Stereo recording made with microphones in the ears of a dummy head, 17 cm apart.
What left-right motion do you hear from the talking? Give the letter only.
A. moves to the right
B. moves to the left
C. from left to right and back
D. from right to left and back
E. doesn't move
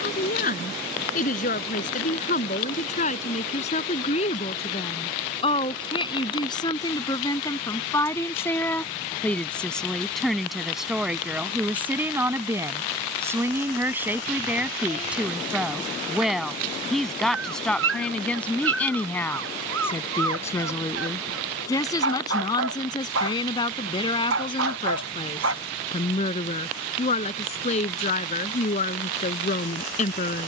C.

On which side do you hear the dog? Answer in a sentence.
You can hear the dog on the right.